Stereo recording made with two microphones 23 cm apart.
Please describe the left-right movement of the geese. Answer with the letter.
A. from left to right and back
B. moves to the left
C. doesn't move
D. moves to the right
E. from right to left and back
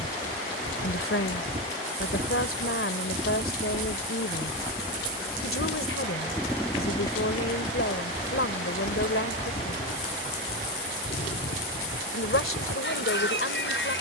B.